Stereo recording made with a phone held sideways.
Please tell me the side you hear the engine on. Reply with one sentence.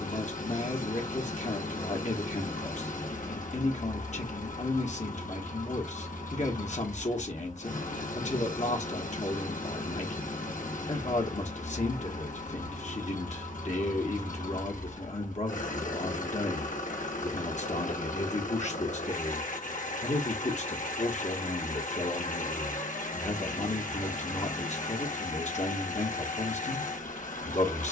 You can hear the engine on the left.